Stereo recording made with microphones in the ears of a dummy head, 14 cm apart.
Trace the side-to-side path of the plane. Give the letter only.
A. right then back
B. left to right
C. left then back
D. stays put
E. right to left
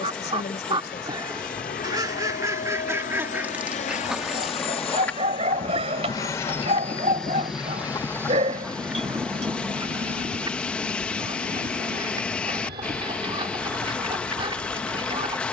B.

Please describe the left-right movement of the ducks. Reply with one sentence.
You can hear the ducks move from right to left and back again.